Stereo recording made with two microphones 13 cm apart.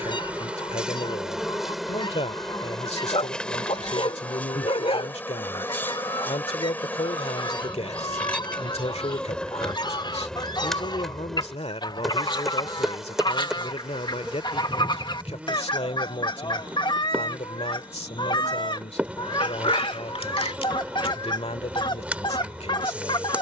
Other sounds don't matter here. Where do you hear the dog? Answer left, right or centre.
left.